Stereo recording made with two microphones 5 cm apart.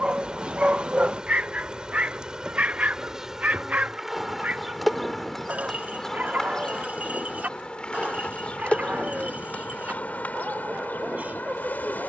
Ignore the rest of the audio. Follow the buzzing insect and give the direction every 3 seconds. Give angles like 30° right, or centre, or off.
20° right, centre, 20° left, 40° left.